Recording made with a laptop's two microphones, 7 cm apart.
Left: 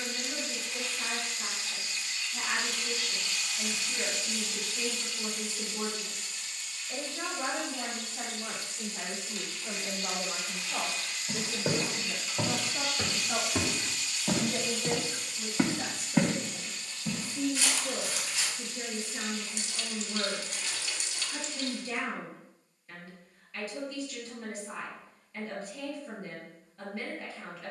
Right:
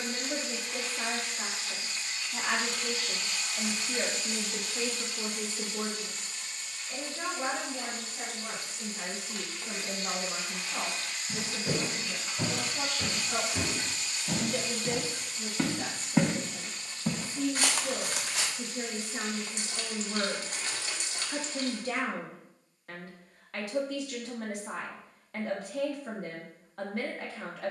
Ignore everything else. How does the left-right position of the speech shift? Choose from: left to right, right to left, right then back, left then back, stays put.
left then back.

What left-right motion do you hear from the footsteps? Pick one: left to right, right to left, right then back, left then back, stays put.
left to right.